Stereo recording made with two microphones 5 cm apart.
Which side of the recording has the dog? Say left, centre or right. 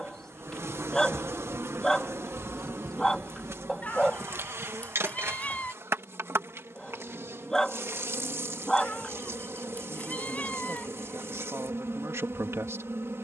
centre.